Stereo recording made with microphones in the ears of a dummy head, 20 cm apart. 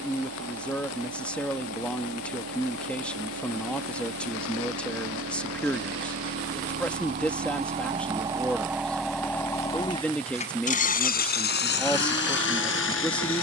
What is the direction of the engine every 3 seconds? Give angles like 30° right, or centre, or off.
70° right, 60° right, 30° right, 30° left, 60° left.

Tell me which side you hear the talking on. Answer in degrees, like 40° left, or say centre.
10° left.